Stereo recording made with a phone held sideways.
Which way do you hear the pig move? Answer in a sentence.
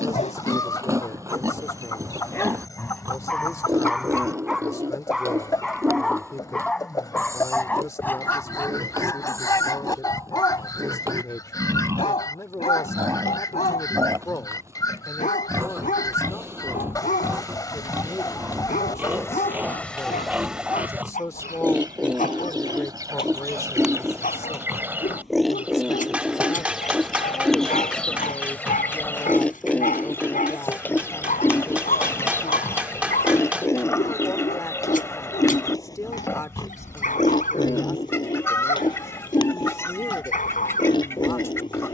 In this clip you hear the pig move from right to left.